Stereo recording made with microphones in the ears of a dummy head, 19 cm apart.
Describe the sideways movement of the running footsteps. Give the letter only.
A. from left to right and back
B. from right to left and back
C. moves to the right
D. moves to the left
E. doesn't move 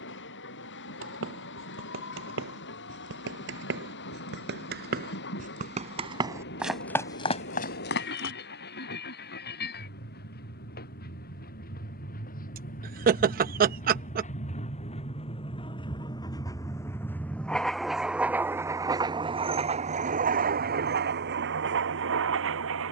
D.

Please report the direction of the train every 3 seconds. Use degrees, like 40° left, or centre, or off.
60° left, 60° left, 50° left, 50° left, 40° left, 20° left, 30° right, 60° right.